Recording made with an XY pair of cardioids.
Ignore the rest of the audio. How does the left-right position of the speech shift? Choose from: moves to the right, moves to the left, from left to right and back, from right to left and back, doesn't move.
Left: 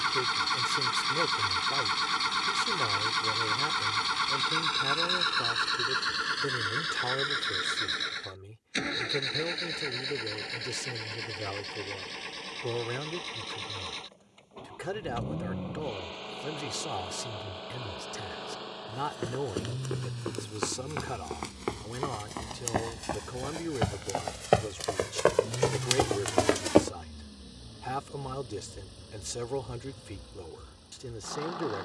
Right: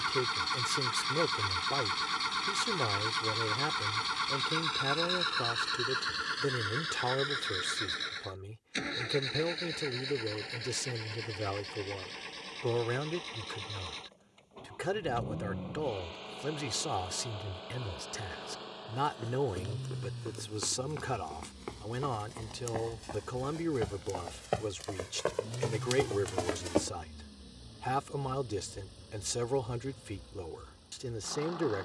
doesn't move.